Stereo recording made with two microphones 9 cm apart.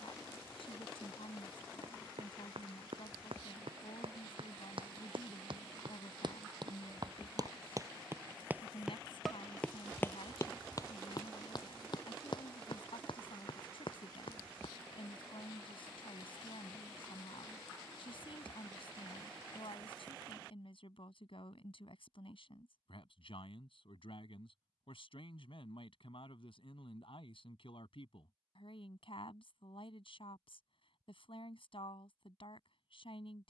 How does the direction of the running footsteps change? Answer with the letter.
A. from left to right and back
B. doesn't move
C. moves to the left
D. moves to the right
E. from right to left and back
C.